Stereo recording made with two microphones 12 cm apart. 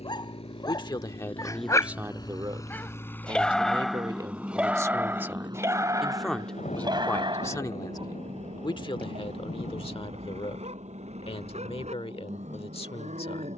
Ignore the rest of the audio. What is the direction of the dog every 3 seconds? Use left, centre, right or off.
left, centre, right, right, right.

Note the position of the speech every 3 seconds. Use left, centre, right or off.
centre, right, left, left, left.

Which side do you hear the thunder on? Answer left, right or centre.
left.